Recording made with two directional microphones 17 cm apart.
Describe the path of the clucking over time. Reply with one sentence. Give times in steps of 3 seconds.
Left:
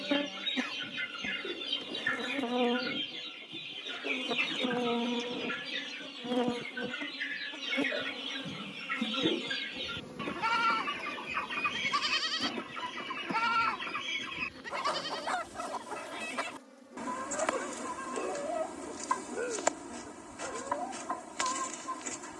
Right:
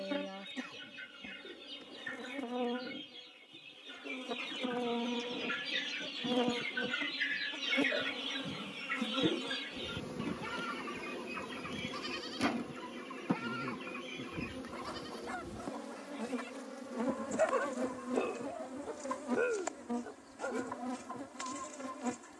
In this clip you hear the clucking on the left from 0 s, in the centre from 6 s and on the left from 9 s.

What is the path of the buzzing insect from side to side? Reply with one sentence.
You can hear the buzzing insect move to the right.